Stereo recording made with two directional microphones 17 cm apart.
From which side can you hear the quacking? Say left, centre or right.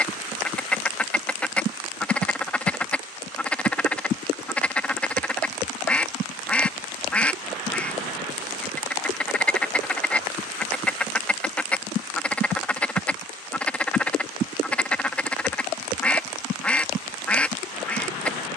centre.